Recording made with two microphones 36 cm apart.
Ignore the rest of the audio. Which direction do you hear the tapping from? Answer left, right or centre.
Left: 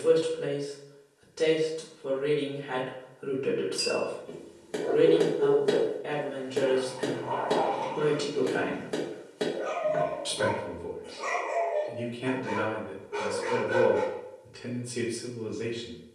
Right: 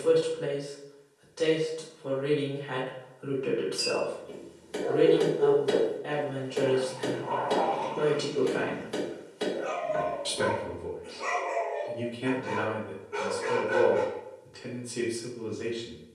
left.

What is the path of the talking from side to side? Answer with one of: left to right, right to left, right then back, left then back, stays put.
right then back.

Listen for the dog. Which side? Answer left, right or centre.
left.